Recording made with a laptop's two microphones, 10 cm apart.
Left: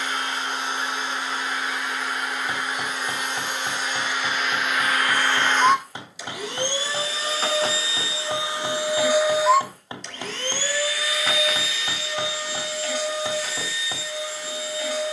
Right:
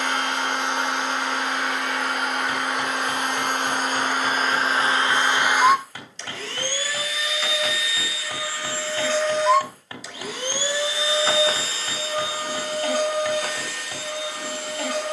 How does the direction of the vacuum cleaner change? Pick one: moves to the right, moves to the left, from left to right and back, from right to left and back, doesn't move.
from right to left and back.